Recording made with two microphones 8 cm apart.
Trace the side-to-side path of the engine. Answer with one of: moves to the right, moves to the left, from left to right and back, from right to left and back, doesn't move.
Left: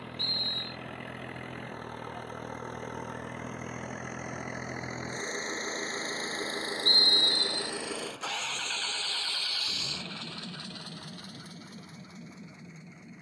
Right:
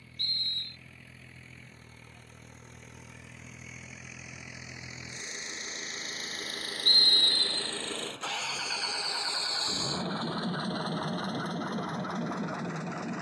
moves to the right.